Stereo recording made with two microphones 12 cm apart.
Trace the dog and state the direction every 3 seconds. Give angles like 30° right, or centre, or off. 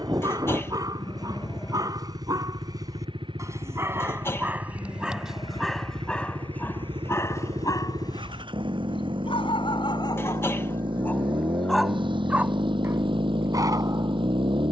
30° right, 10° right, 20° left, 30° left, 20° right.